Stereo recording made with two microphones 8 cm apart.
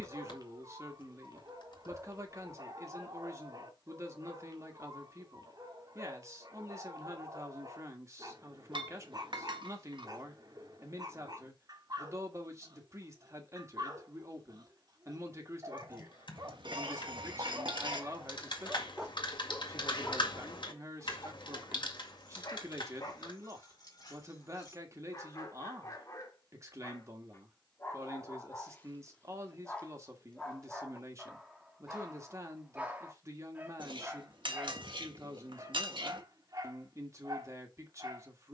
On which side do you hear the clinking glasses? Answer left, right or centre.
right.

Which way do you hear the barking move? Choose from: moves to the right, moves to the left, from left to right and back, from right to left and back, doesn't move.
from right to left and back.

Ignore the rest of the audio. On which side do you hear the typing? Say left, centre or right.
left.